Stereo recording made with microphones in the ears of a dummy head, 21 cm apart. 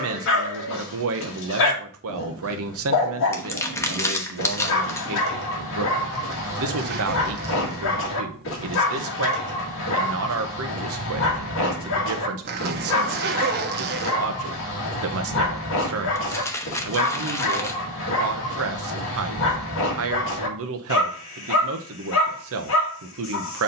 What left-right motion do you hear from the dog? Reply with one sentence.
In this clip you hear the dog stay put.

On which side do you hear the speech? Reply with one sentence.
In this clip you hear the speech on the right.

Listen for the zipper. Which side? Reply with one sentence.
In this clip you hear the zipper on the right.